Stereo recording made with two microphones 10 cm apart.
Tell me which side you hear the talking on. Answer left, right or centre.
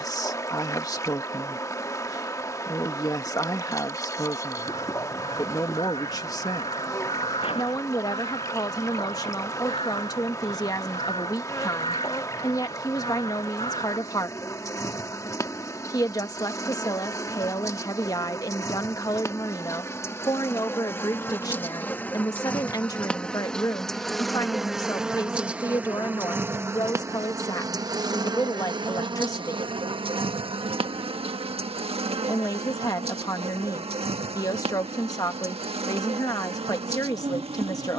left.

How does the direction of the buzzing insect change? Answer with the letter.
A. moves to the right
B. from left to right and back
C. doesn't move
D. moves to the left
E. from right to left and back
A.